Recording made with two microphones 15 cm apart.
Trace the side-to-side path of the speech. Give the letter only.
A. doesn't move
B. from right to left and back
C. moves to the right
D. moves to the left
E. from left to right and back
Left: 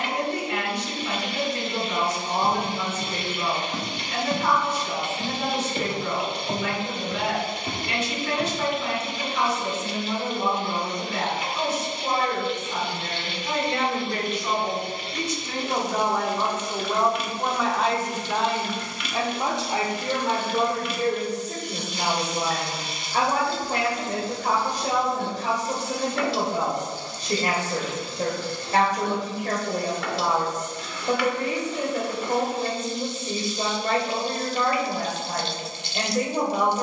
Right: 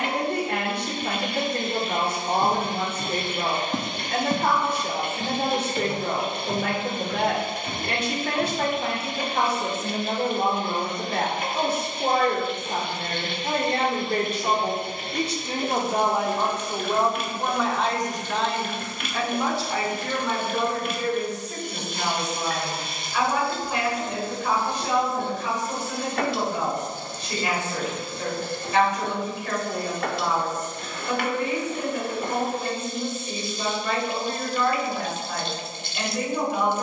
D.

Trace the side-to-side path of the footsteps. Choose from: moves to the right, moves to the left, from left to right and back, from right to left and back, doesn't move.
moves to the left.